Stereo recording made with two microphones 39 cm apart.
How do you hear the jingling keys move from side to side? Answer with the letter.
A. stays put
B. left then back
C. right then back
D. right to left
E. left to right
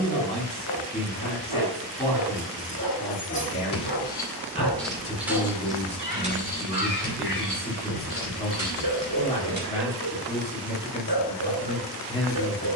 E.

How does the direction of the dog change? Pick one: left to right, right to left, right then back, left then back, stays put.
stays put.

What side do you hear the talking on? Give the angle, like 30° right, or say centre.
20° left.